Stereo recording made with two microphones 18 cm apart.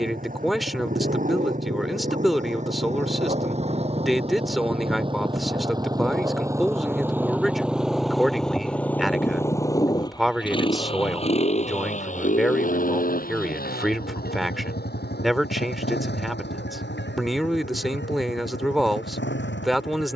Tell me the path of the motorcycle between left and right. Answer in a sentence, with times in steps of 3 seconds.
You can hear the motorcycle on the right from 0 s, in the centre from 6 s and on the left from 9 s.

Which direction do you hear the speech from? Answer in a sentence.
In this clip you hear the speech in the centre.